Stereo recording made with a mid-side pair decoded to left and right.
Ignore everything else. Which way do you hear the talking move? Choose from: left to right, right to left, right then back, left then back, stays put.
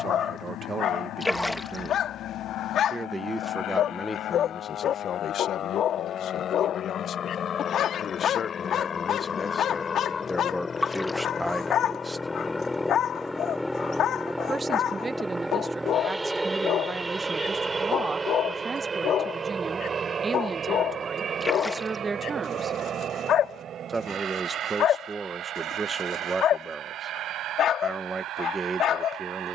left then back.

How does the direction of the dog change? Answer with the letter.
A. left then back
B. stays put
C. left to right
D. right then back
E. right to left
B.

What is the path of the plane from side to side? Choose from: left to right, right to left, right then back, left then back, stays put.
left to right.